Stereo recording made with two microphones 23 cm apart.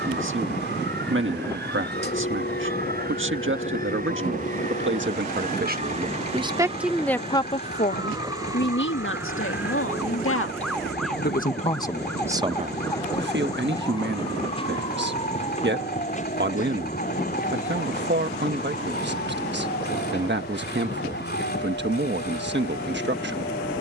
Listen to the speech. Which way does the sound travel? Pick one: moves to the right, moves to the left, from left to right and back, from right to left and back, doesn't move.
from right to left and back.